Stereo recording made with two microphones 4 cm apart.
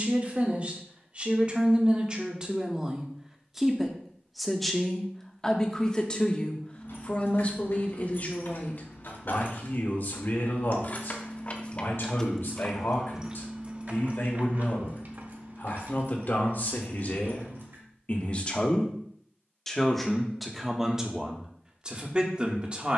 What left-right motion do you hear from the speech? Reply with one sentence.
In this clip you hear the speech move from right to left and back again.